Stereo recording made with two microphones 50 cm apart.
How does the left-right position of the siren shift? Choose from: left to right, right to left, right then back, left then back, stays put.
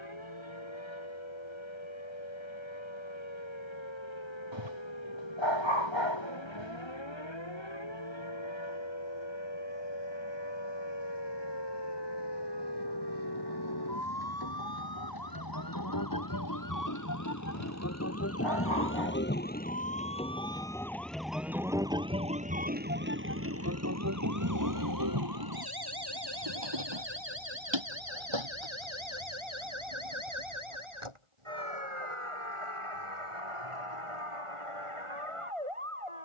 left to right.